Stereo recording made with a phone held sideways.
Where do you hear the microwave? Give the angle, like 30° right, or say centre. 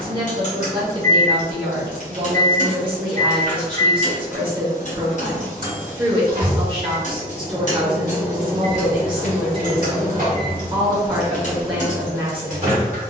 60° right.